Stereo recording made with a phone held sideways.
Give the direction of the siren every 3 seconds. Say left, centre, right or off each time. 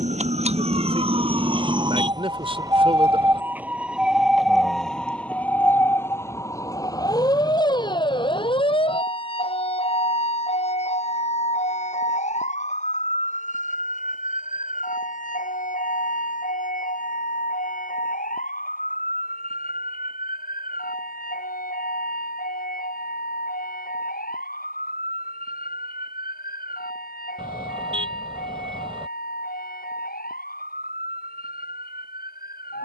right, centre, left, left, left, left, left, left, left, left, left.